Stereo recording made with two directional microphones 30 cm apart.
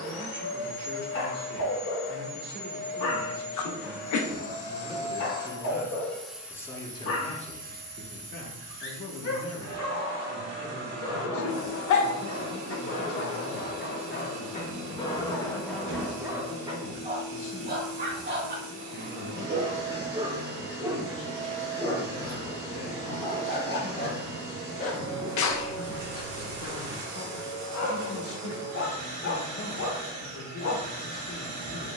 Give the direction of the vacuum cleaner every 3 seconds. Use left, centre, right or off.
left, left, right, right, right, right, right, right, right, right, right.